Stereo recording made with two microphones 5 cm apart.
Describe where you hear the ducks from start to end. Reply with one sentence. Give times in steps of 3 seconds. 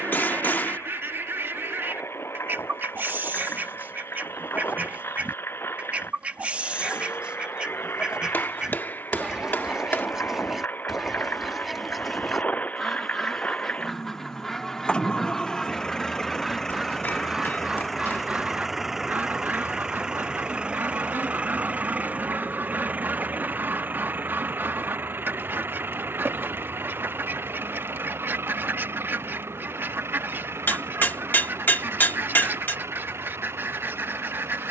In this clip you hear the ducks on the right from 0 s, in the centre from 9 s and on the right from 18 s.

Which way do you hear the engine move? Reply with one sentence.
You can hear the engine move from left to right.